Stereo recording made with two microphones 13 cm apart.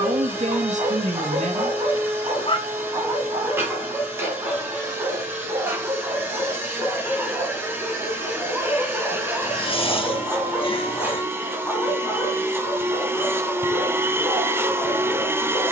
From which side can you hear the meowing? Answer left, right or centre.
left.